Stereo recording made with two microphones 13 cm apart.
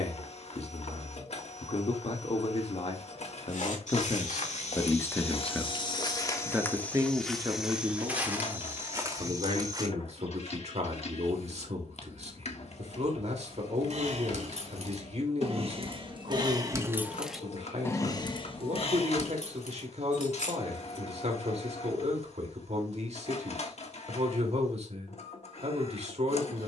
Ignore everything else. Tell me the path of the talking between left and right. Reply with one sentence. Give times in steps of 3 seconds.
In this clip you hear the talking on the left from 0 s and on the right from 6 s.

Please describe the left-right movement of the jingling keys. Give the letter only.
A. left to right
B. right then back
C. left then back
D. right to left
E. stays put
D.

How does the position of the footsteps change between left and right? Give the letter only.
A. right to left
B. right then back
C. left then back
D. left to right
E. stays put
D.